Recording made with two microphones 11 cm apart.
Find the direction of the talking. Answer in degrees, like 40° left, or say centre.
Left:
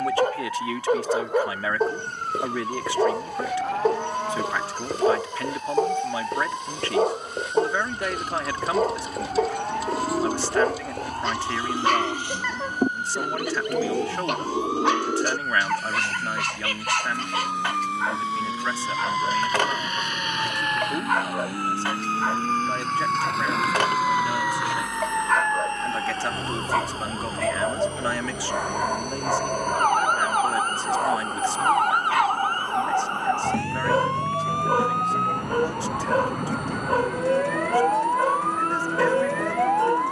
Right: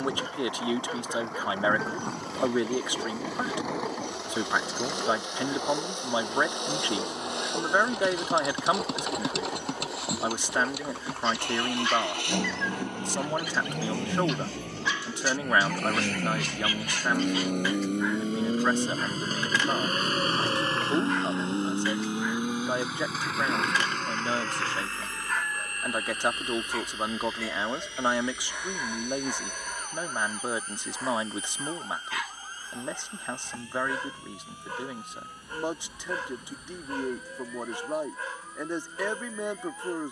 20° right.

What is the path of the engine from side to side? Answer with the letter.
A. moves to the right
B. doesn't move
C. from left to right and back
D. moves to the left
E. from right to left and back
D.